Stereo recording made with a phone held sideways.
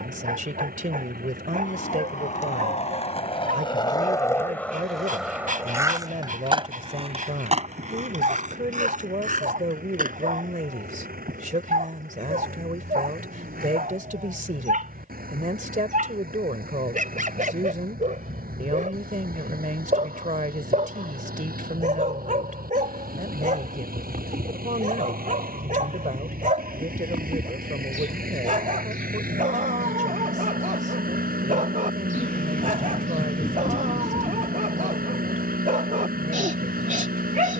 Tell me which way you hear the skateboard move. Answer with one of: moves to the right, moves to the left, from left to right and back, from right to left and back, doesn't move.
moves to the right.